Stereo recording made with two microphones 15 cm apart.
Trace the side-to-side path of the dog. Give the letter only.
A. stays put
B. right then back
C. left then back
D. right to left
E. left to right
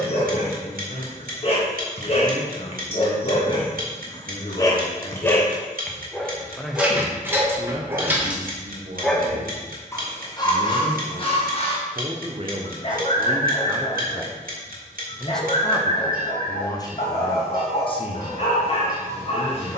B.